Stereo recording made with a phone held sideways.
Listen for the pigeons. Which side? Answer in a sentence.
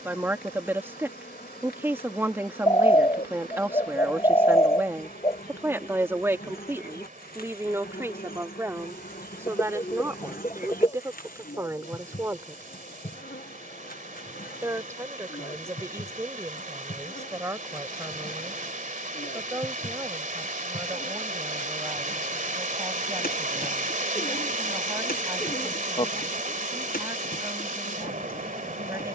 You can hear the pigeons on the left.